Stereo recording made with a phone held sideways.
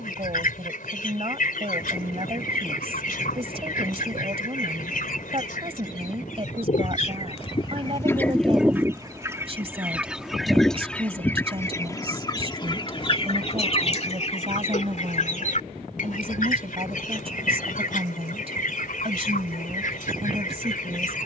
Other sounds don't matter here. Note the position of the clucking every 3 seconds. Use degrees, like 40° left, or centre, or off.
60° left, 60° left, 30° left, centre, 40° left, 50° left, 60° left.